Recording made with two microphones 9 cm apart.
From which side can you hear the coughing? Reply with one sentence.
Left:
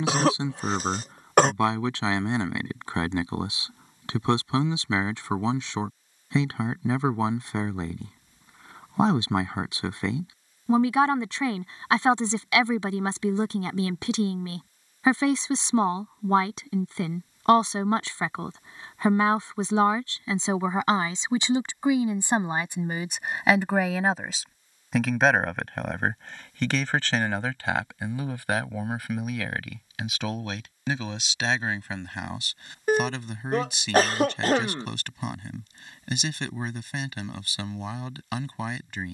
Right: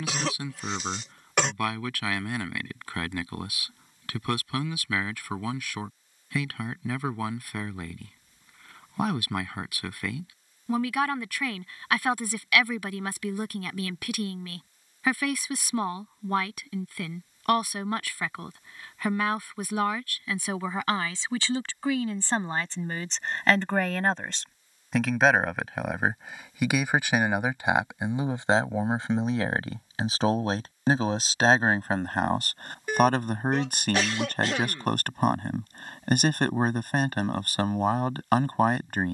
You can hear the coughing on the left.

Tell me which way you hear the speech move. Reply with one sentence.
You can hear the speech travel towards the right.